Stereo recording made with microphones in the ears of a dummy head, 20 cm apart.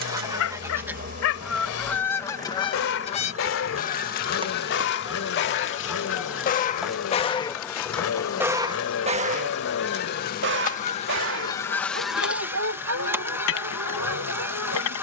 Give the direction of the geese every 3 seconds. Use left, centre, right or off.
centre, left, left, left, centre.